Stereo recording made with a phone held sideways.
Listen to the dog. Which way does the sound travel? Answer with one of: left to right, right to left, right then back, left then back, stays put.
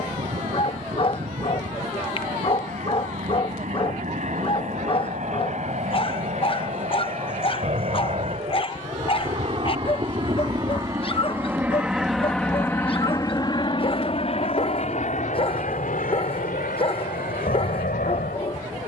stays put.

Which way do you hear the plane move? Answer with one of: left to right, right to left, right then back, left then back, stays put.
right to left.